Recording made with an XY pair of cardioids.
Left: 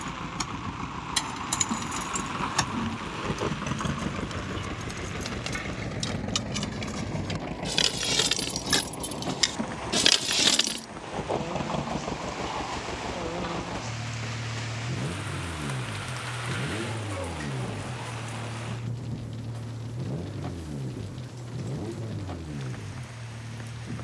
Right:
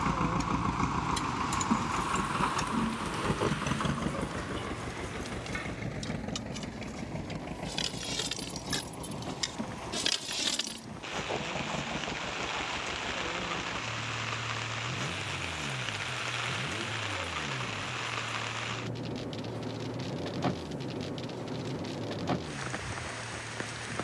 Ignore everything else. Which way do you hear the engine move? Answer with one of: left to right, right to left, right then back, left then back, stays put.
right to left.